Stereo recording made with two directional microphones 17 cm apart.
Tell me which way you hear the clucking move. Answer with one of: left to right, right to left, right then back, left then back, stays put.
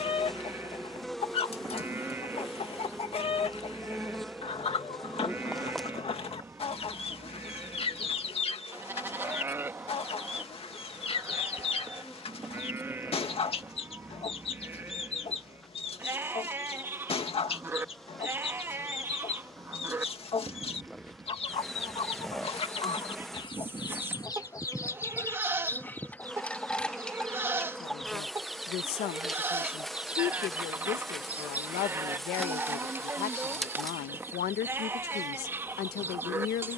left to right.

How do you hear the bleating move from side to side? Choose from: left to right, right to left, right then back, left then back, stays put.
stays put.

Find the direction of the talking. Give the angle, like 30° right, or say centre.
70° left.